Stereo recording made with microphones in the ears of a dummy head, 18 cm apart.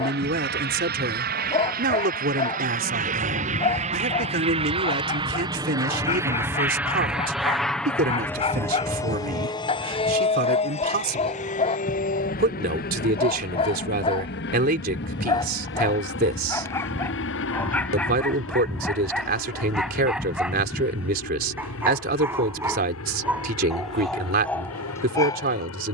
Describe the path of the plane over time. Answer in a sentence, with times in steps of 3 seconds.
You can hear the plane on the right from 0 s, in the centre from 6 s and on the left from 9 s.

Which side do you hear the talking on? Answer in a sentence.
In this clip you hear the talking on the right.